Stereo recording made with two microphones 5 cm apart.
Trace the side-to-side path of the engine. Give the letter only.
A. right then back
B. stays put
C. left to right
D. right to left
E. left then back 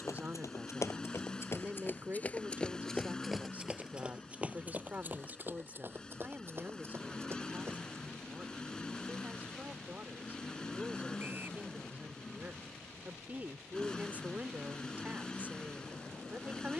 B.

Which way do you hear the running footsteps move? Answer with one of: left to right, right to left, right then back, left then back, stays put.
left to right.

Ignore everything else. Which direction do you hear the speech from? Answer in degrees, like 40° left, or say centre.
30° right.